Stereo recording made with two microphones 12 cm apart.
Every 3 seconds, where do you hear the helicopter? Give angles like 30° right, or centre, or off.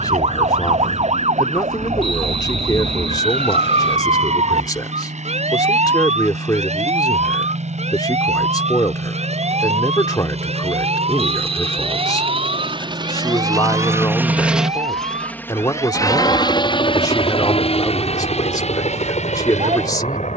80° right, 80° right, 70° right, 60° right, 30° right, 30° left, 60° left.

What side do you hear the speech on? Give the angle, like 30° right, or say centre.
30° left.